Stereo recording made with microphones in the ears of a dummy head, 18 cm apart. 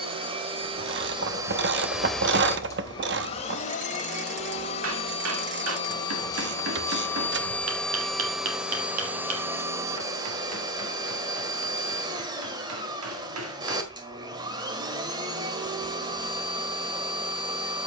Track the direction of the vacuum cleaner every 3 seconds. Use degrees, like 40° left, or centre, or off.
10° right, 30° left, 10° left, 20° right, 20° right, 20° right.